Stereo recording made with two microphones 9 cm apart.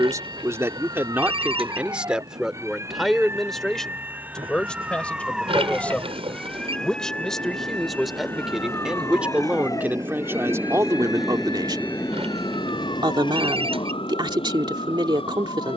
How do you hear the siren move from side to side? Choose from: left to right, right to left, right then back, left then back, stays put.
right to left.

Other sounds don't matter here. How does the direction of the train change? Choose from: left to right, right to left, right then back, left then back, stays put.
right to left.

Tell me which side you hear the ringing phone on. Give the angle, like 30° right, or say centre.
80° right.